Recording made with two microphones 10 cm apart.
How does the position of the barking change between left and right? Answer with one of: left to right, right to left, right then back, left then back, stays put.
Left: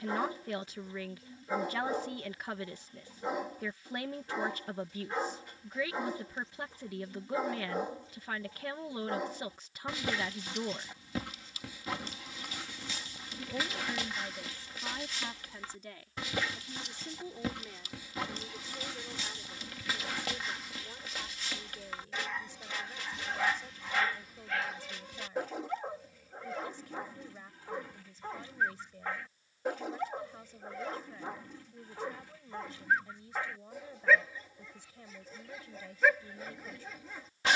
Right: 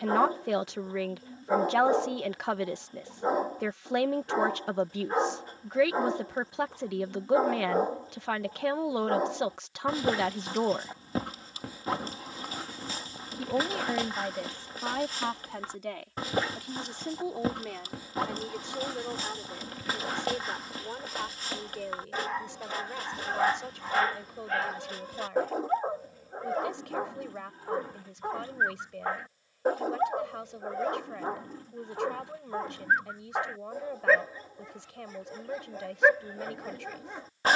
stays put.